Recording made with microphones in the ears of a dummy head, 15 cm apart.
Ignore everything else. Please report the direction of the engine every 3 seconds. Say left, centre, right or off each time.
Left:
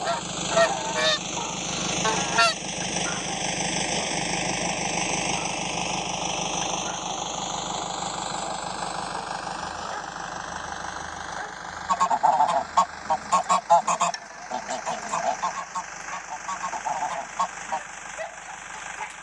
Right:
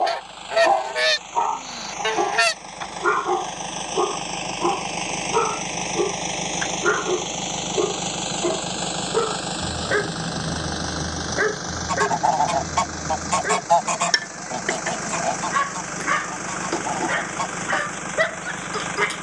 left, centre, right, right, right, right, right.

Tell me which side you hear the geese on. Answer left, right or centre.
right.